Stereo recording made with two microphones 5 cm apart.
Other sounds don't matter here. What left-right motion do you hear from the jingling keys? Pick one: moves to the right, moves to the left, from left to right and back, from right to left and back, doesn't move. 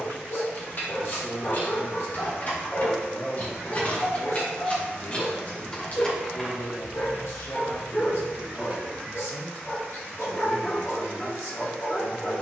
moves to the right.